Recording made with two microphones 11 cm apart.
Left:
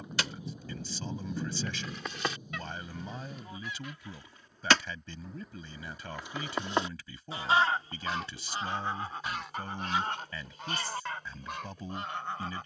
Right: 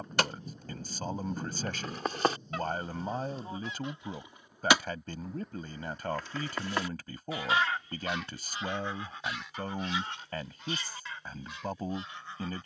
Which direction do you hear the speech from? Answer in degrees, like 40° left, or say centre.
50° right.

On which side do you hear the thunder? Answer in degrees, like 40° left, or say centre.
10° left.